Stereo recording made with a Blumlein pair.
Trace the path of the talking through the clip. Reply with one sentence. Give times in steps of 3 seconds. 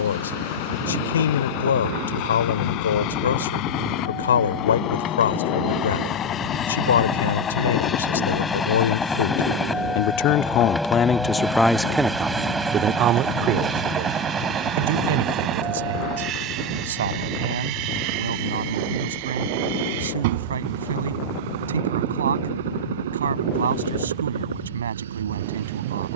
You can hear the talking on the left from 0 s and on the right from 12 s.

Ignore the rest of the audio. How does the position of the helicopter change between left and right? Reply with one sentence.
In this clip you hear the helicopter travel towards the right.